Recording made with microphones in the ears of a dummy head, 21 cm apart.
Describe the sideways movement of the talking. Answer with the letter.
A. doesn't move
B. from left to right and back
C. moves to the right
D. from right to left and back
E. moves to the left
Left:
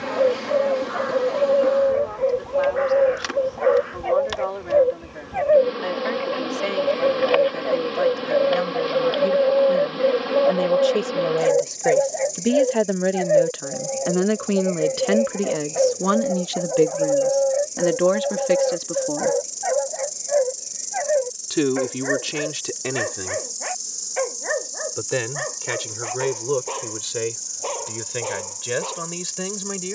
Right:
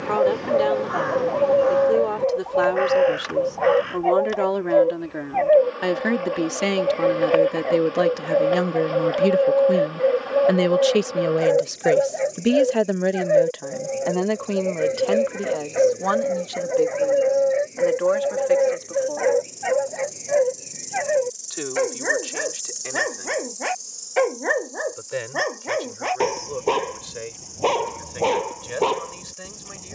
E.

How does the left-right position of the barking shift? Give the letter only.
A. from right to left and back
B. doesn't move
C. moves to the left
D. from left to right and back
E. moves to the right
E.